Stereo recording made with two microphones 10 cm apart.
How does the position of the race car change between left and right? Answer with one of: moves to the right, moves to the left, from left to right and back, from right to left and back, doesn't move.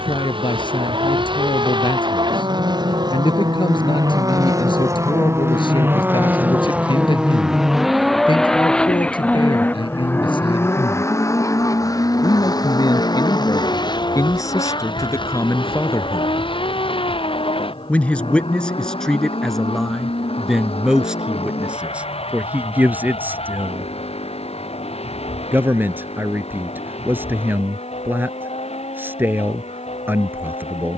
moves to the left.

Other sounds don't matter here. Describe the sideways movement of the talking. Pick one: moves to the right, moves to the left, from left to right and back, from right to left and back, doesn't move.
moves to the right.